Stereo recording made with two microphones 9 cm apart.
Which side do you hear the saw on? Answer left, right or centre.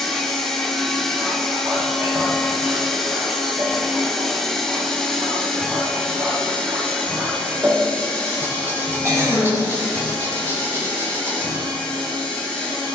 right.